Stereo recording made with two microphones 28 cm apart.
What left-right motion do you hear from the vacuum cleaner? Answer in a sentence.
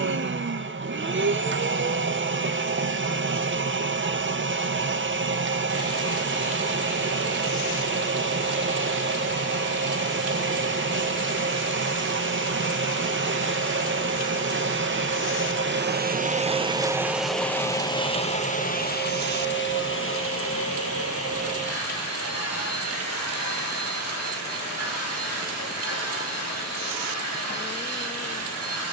In this clip you hear the vacuum cleaner travel towards the left.